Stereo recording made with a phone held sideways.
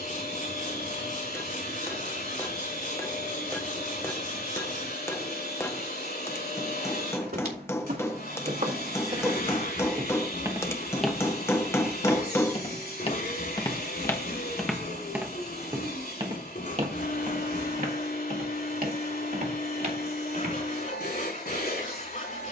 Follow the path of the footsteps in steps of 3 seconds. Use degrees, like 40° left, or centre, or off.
off, off, 60° right, 20° right, 20° left, 30° right, 60° right, off.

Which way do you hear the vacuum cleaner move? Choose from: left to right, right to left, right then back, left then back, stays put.
stays put.